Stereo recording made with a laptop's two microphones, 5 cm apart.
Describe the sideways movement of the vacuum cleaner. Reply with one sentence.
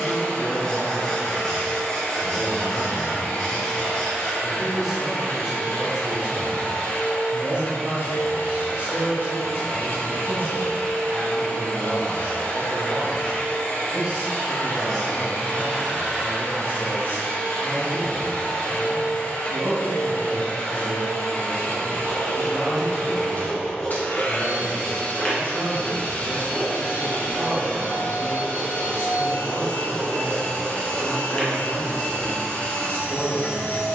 You can hear the vacuum cleaner stay in one place.